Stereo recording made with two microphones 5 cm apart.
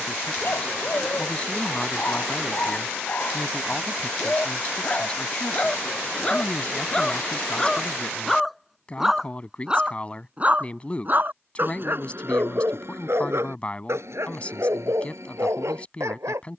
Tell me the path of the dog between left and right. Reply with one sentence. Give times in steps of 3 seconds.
You can hear the dog on the left from 0 s, in the centre from 6 s and on the right from 9 s.